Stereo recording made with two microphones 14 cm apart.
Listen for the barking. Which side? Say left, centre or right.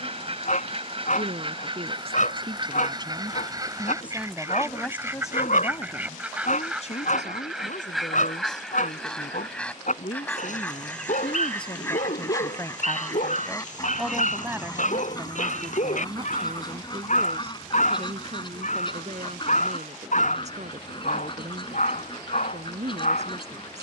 left.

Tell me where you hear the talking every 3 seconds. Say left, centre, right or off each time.
right, centre, left, left, centre, right, right, right.